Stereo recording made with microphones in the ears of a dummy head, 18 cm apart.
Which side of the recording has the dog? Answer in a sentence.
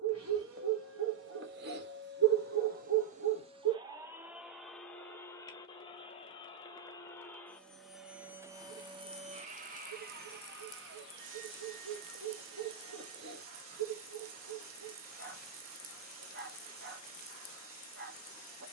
You can hear the dog on the right.